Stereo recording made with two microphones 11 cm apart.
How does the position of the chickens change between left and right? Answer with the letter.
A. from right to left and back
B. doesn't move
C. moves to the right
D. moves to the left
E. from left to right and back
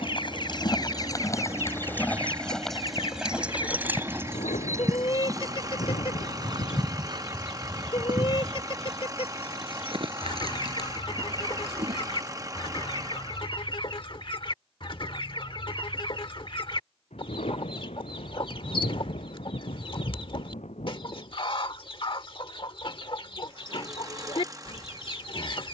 B.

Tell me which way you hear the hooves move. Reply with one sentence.
In this clip you hear the hooves travel towards the right.